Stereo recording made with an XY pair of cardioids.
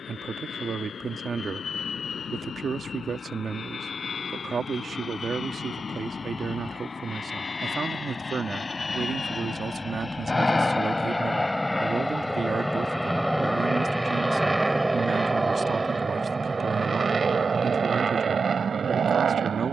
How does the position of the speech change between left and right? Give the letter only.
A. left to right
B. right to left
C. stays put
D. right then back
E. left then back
C.